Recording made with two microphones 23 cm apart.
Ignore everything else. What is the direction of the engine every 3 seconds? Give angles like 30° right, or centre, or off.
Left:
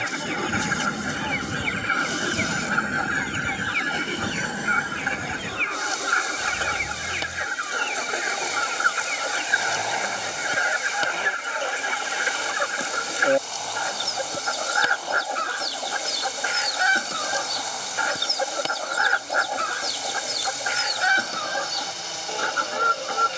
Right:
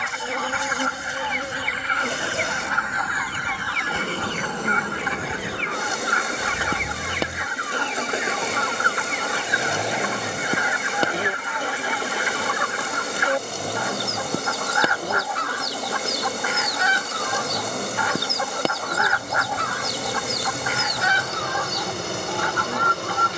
50° left, 10° left, 20° right, 30° right, 40° right, 50° right, 50° right, 50° right.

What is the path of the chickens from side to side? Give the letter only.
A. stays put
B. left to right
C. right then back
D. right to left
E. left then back
A.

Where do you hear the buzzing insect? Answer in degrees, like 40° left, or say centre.
60° right.